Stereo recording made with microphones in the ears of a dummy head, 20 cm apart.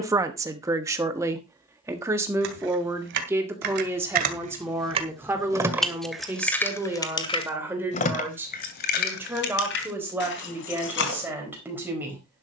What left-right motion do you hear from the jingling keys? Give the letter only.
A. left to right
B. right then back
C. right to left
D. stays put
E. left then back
C.